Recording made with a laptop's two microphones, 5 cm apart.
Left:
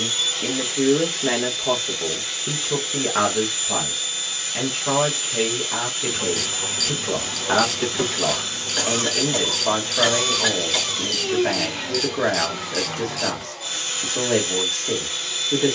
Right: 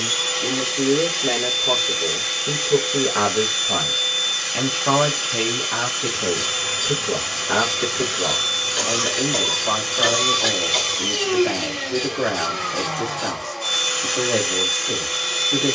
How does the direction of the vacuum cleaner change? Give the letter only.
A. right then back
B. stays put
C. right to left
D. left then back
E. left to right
B.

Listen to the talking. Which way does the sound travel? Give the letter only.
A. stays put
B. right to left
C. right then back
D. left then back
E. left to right
C.